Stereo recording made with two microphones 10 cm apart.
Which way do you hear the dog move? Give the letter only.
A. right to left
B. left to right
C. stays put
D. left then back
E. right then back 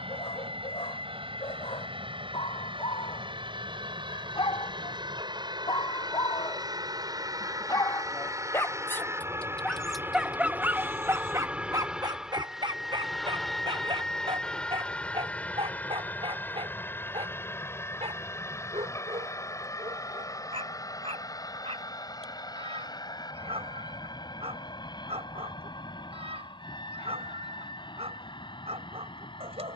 B.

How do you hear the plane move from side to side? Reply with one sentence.
You can hear the plane travel towards the left.